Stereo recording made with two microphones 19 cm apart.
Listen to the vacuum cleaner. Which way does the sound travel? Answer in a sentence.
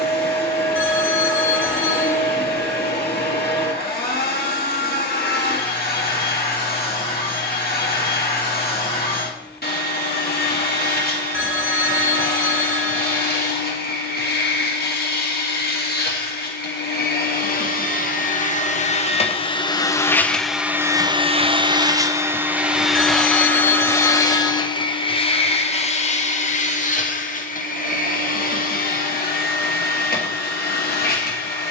You can hear the vacuum cleaner move from left to right and back again.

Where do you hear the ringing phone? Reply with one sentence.
You can hear the ringing phone on the left.